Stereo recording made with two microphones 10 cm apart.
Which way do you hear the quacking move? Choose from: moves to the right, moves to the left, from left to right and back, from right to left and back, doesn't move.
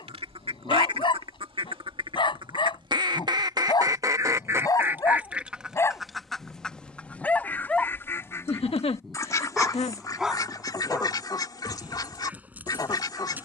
moves to the left.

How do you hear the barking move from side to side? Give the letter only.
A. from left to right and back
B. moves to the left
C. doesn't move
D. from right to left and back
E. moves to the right
E.